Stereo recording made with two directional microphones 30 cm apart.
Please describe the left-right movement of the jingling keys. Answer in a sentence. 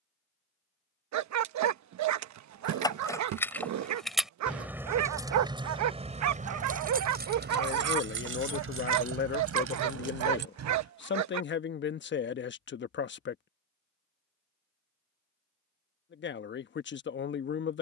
In this clip you hear the jingling keys travel towards the right.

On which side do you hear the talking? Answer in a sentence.
You can hear the talking on the left.